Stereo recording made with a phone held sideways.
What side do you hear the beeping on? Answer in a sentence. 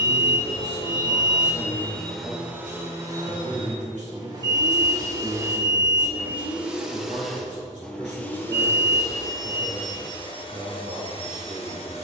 In this clip you hear the beeping on the right.